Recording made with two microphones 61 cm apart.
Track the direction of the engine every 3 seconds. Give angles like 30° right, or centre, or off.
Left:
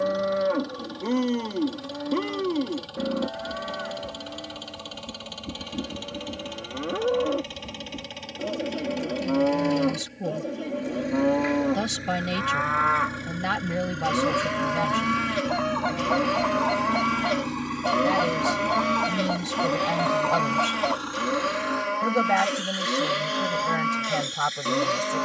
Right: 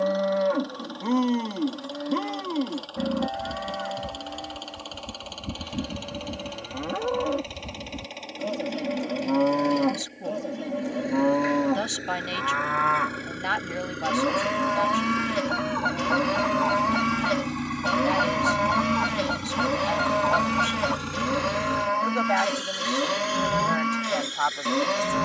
50° left, 50° left, 40° left, 40° left, 20° left, centre, 30° right, 60° right, 80° right.